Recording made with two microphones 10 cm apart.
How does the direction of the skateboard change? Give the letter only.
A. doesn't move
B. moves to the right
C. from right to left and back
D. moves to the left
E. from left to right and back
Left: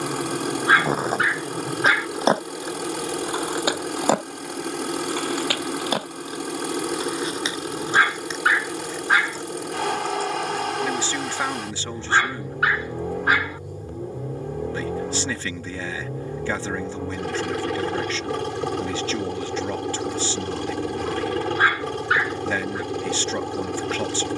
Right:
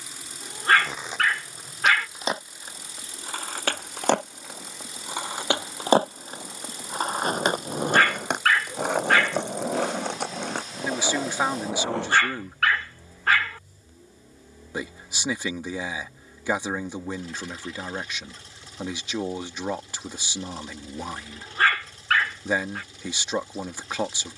B.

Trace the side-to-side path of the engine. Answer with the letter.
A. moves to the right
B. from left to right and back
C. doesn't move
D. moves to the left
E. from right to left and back
C.